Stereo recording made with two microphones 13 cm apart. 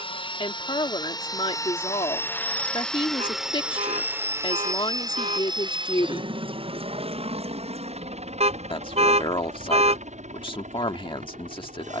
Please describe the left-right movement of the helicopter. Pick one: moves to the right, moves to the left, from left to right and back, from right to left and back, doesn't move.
moves to the right.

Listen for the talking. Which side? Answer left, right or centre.
left.